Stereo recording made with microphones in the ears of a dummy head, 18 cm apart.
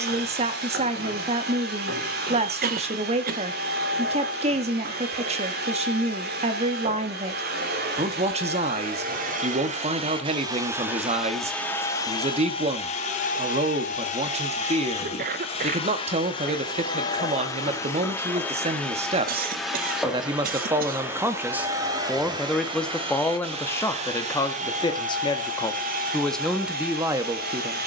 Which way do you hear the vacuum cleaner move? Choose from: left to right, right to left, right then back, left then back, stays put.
left then back.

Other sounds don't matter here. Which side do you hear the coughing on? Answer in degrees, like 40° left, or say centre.
50° right.